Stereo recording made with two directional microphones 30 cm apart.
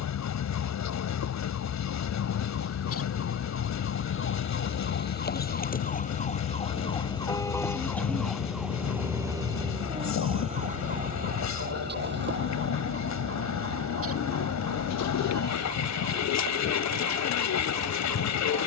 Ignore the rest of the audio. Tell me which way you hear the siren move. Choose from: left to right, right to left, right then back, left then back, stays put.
left to right.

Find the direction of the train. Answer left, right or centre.
left.